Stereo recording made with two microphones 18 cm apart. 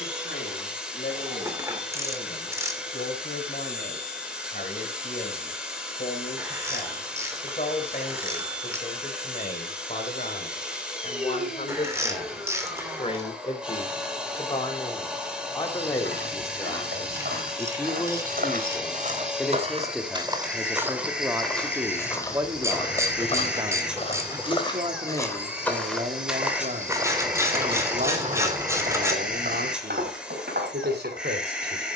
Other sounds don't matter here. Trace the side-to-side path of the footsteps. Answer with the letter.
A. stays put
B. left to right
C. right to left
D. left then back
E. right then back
D.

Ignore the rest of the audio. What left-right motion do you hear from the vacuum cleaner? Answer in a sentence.
In this clip you hear the vacuum cleaner stay put.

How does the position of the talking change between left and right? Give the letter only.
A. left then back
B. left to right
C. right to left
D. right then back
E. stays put
B.